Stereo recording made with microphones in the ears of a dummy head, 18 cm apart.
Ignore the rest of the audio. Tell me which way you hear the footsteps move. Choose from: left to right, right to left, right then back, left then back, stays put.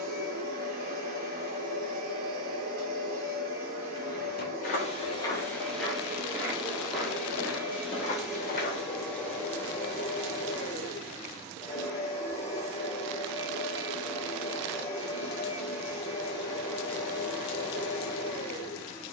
right then back.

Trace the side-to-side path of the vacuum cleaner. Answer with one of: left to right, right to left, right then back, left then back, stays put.
right to left.